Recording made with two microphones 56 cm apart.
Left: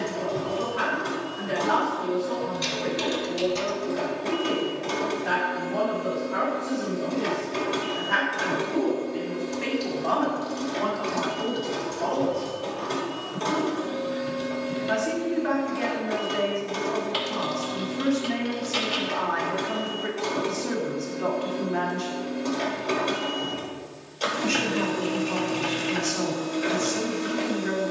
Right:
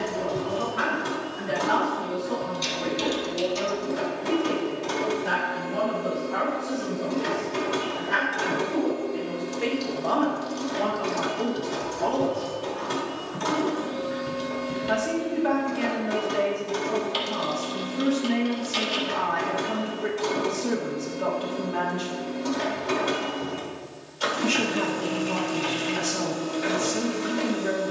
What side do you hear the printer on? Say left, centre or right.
right.